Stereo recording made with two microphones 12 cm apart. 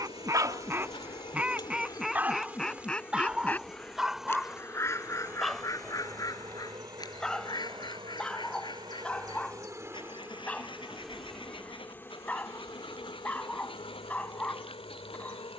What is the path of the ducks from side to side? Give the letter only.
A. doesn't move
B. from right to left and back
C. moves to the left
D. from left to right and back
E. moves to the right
C.